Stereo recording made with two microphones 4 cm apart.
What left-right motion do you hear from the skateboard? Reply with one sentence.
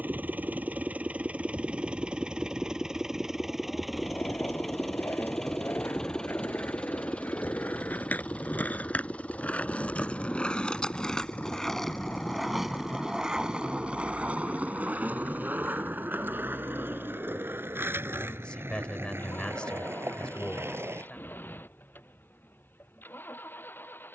You can hear the skateboard move to the right.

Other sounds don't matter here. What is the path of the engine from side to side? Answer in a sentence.
In this clip you hear the engine move from right to left.